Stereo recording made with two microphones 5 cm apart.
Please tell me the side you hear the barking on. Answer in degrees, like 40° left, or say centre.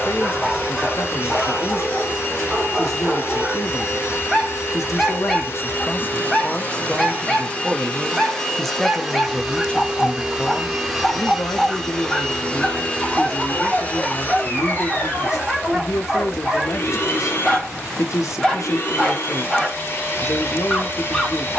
10° left.